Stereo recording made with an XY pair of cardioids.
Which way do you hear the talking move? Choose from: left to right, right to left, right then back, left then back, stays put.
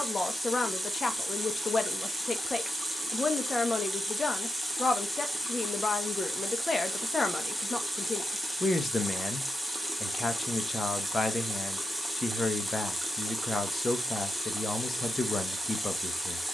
stays put.